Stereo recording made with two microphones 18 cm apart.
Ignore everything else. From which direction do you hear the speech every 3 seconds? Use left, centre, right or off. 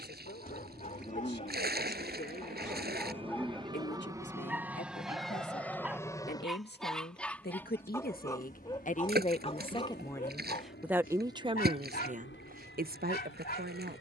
left, left, left, centre, right.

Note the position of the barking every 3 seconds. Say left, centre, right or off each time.
left, centre, centre, left, left.